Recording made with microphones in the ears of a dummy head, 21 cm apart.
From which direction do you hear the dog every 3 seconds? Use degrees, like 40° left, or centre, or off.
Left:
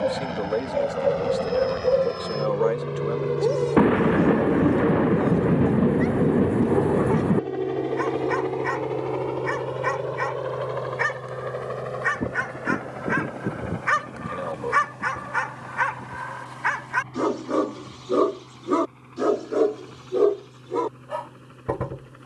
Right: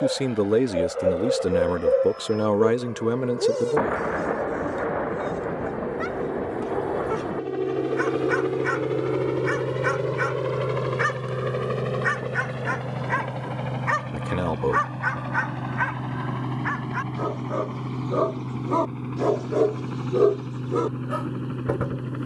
20° right, 20° right, 20° right, 10° right, 10° left, 60° left, 10° left, 20° right.